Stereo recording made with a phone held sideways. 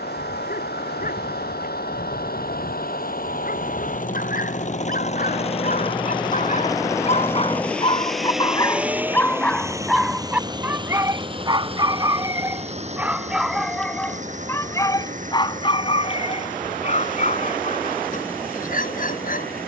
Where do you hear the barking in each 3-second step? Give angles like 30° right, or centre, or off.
60° left, 60° left, 30° left, 10° right, centre, 40° left, 50° left.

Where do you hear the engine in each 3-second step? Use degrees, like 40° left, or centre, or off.
70° left, 50° left, 10° left, 20° right, 40° right, 50° right, 60° right.